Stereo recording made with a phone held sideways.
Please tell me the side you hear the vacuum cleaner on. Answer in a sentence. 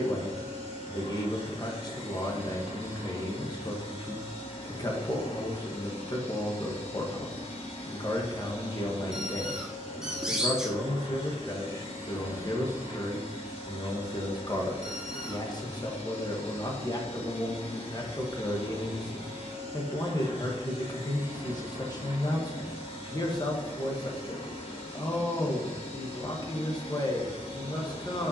In this clip you hear the vacuum cleaner on the left.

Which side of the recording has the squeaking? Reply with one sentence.
In this clip you hear the squeaking in the centre.